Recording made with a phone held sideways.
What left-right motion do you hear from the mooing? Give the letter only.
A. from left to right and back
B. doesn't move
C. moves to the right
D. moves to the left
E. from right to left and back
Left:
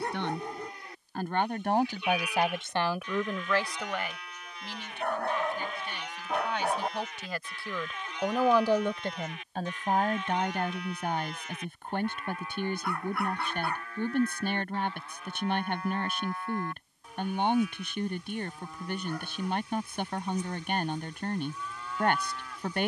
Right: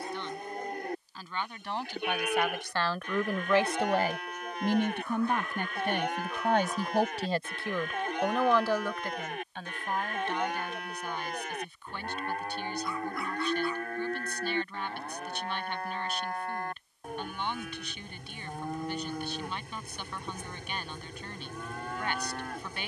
B.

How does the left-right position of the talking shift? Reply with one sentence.
In this clip you hear the talking go right and come back.